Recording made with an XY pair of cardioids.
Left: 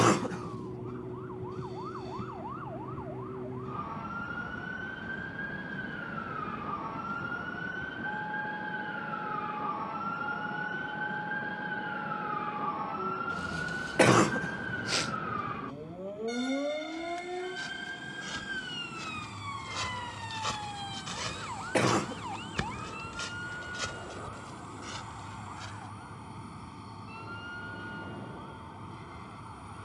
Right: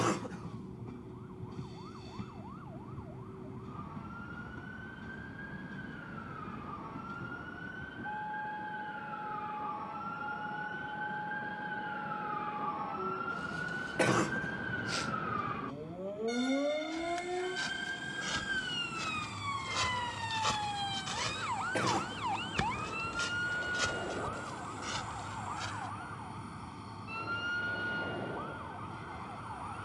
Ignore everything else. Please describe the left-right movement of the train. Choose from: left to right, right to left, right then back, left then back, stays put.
stays put.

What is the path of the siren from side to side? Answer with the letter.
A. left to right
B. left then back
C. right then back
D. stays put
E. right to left
A.